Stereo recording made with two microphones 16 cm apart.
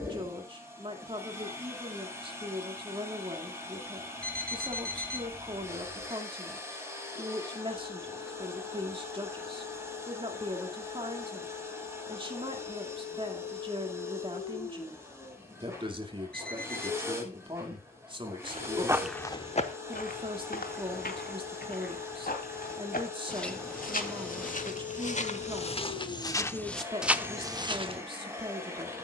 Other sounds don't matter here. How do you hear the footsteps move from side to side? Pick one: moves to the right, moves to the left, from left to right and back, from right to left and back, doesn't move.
from right to left and back.